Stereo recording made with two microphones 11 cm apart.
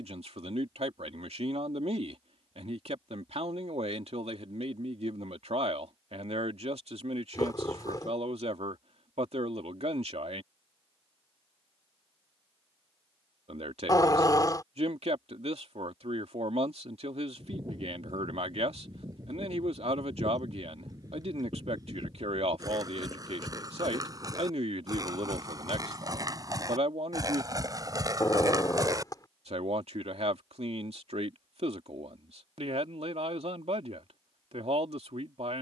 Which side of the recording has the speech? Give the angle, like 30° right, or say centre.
70° right.